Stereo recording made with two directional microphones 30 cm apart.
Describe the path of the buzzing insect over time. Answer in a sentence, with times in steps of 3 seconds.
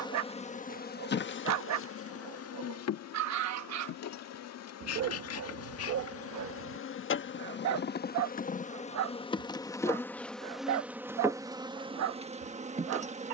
You can hear the buzzing insect on the left from 0 s, in the centre from 9 s and on the right from 12 s.